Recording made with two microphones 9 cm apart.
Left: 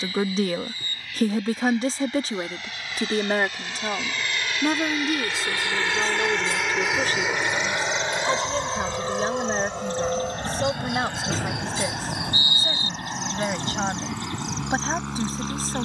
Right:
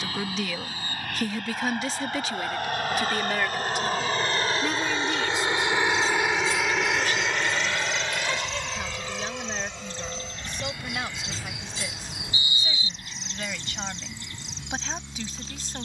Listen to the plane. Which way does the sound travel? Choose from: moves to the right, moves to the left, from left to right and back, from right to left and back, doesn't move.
moves to the left.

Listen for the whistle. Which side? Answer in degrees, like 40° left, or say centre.
60° left.